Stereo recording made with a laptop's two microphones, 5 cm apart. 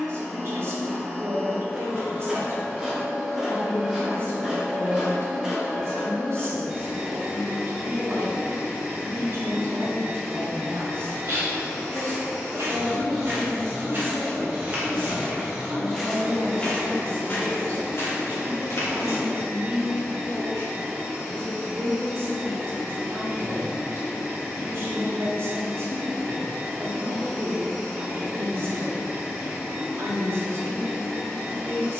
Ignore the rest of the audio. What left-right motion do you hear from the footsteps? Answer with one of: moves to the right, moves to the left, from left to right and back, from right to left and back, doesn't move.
moves to the left.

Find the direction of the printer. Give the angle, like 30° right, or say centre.
10° right.